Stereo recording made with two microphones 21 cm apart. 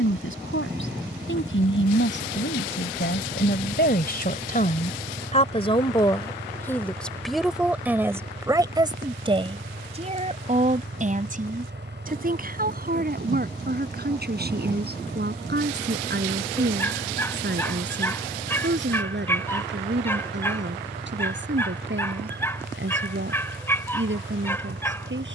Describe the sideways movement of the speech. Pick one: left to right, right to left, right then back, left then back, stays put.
left to right.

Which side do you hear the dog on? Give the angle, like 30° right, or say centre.
10° left.